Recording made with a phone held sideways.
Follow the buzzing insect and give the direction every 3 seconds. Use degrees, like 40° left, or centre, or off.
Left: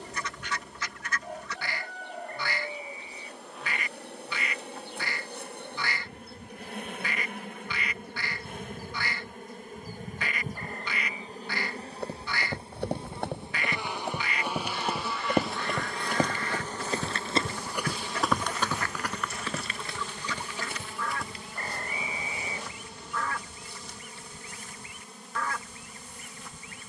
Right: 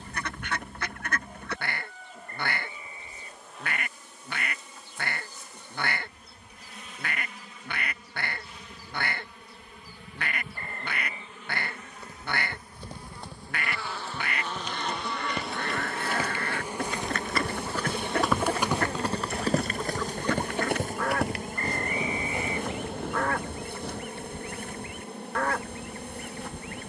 70° left, 60° left, 50° left, 40° left, 20° left, 10° right, 30° right, 50° right, 60° right.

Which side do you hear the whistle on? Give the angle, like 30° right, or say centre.
centre.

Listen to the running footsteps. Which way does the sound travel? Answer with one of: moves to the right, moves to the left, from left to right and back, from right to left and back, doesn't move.
moves to the right.